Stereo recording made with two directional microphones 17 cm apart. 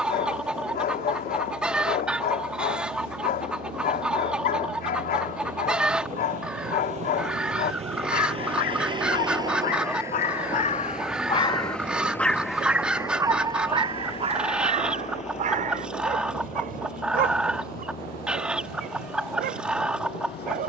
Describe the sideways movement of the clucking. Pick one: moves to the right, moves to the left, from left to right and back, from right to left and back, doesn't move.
doesn't move.